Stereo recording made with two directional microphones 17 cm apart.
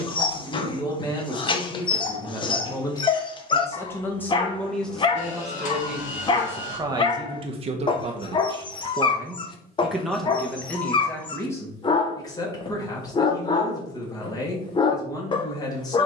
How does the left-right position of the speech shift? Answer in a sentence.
In this clip you hear the speech move from left to right and back again.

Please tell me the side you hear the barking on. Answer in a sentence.
You can hear the barking on the left.